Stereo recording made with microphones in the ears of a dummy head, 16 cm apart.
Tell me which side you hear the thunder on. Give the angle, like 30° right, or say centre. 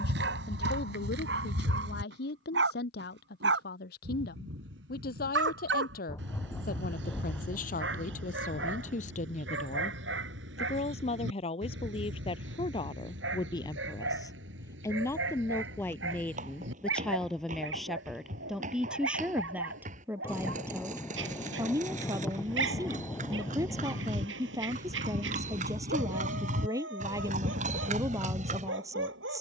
10° left.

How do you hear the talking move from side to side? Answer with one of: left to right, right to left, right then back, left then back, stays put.
left to right.